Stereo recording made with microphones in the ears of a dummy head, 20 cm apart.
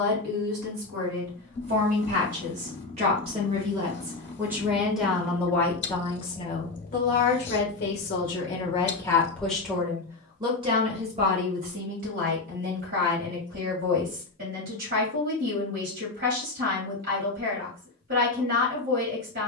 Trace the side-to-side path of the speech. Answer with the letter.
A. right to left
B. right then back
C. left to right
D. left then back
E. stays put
D.